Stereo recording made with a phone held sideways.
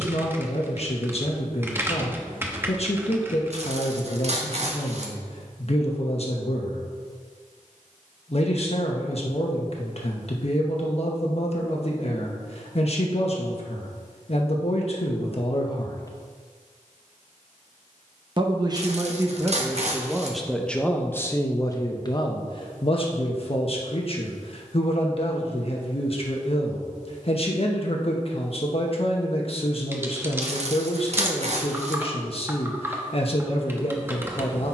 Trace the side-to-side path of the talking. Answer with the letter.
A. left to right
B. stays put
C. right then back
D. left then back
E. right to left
C.